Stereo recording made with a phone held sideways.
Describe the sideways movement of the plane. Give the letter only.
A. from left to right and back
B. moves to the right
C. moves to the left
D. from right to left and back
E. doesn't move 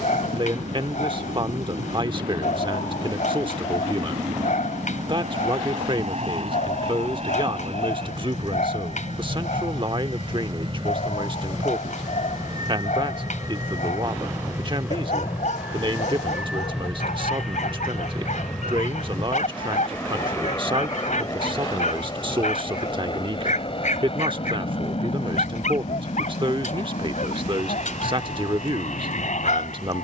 C.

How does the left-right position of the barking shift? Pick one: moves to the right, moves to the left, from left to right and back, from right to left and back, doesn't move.
doesn't move.